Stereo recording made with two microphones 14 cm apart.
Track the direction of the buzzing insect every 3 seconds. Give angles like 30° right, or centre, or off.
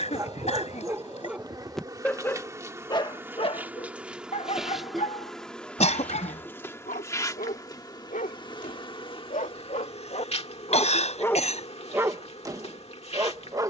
30° right, centre, 20° left, 50° left, 50° left.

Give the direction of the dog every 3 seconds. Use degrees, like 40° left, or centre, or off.
10° right, 50° left, 70° left, 40° left, 20° right.